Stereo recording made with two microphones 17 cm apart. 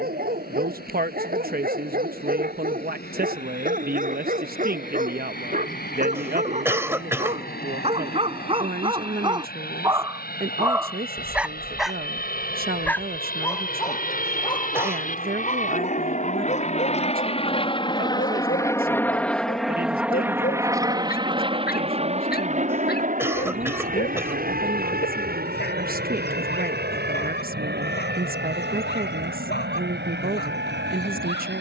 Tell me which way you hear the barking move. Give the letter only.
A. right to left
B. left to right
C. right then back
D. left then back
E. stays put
A.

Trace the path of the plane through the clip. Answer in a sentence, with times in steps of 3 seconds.
You can hear the plane on the left from 0 s, in the centre from 18 s and on the right from 21 s.